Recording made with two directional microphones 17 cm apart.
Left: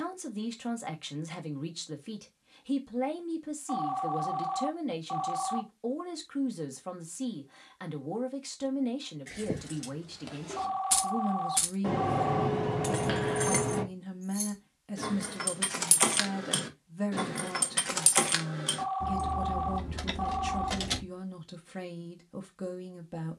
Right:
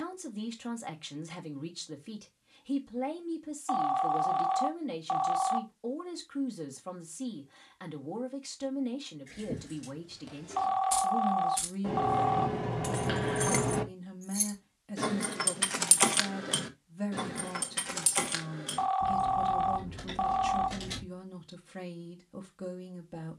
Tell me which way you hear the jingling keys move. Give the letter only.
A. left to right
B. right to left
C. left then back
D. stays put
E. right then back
E.